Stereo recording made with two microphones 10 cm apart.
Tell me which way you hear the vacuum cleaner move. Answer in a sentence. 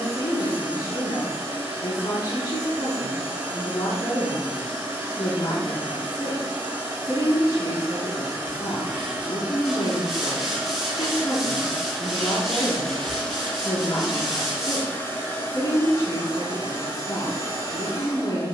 In this clip you hear the vacuum cleaner go from the right side to the left.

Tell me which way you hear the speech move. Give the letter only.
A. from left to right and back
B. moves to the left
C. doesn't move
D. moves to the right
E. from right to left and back
C.